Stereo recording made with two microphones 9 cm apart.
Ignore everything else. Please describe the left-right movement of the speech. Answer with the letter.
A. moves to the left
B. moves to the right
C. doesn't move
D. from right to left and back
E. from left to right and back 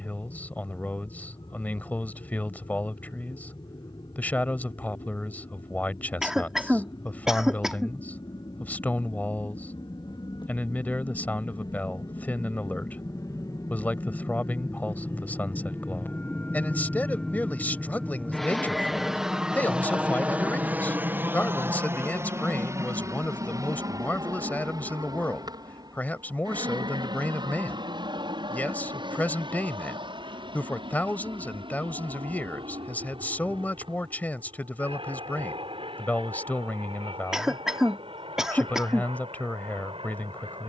C.